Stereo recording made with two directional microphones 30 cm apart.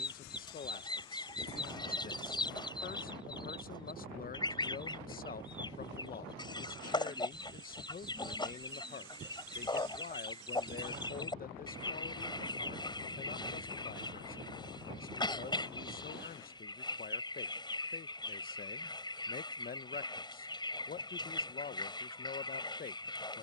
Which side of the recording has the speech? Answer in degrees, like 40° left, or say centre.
30° left.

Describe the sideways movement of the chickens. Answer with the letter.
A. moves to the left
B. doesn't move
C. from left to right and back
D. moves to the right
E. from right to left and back
B.